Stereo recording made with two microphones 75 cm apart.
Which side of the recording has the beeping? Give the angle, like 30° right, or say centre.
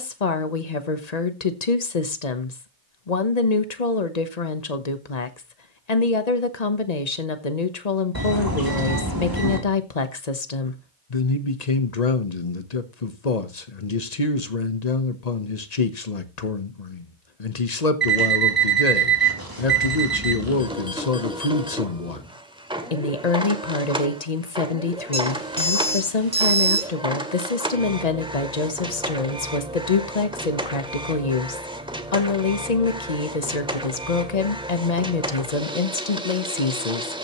30° right.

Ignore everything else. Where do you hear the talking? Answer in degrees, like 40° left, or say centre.
60° left.